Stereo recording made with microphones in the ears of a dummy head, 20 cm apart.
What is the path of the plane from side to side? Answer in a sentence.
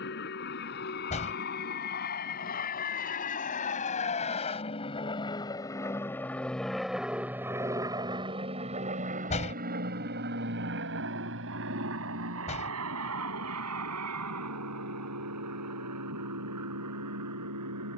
You can hear the plane move to the right.